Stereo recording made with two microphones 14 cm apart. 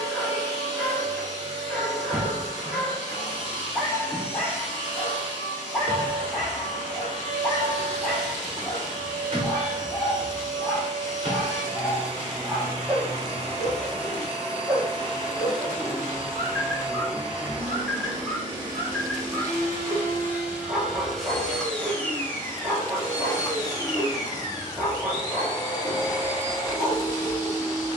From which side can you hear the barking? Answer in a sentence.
You can hear the barking in the centre.